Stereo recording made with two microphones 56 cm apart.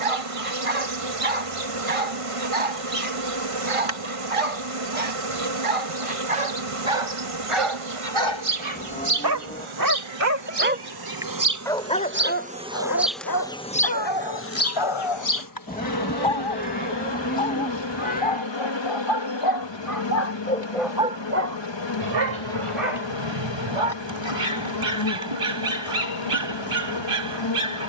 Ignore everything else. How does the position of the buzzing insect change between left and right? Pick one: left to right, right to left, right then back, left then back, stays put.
right to left.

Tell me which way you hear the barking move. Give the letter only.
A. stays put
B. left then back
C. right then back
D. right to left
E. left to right
B.